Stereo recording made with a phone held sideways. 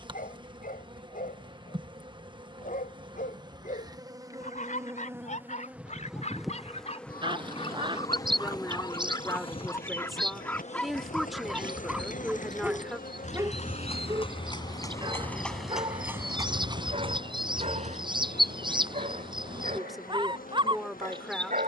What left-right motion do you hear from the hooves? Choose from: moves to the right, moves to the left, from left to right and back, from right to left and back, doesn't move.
moves to the right.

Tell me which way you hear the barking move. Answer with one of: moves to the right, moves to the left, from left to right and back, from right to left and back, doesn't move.
moves to the right.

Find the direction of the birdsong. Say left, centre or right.
right.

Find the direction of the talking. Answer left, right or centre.
centre.